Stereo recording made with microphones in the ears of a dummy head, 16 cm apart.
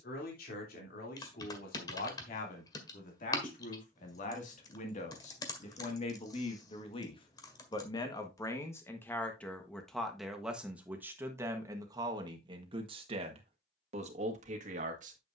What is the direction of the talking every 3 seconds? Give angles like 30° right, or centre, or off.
60° left, 50° left, 30° left, 10° right, 40° right.